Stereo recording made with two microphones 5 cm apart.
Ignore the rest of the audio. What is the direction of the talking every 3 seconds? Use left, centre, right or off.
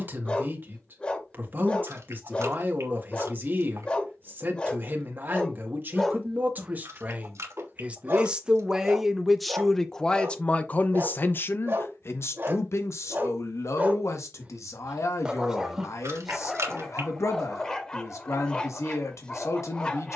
right, right, right, left, left, left, left.